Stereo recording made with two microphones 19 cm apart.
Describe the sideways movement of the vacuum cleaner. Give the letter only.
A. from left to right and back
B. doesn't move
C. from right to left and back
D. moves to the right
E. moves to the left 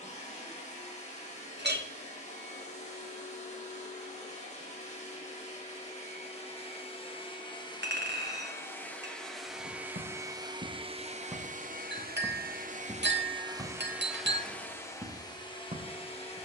A.